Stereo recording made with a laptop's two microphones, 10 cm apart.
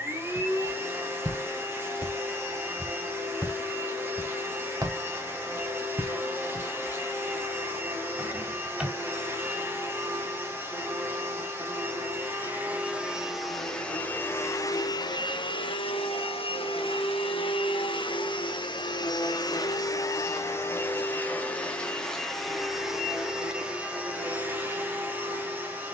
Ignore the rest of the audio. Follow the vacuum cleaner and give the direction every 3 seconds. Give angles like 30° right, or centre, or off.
20° right, 20° right, 20° right, 20° right, centre, 60° left, 40° left, centre, 20° right.